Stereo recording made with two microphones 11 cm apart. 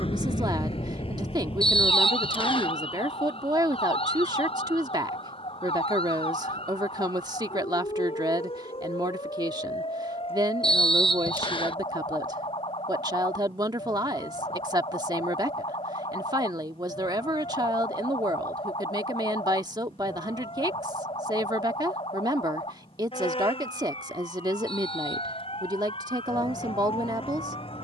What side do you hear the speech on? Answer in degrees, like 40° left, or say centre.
40° right.